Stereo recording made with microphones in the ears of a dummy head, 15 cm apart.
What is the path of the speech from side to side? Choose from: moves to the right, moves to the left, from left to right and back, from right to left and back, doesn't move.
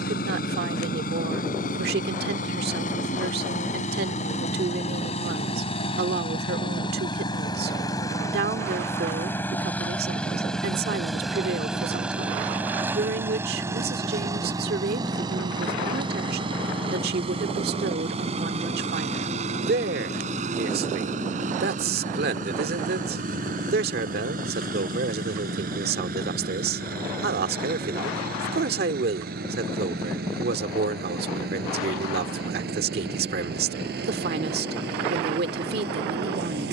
doesn't move.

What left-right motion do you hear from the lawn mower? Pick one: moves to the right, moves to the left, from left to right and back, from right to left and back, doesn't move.
moves to the right.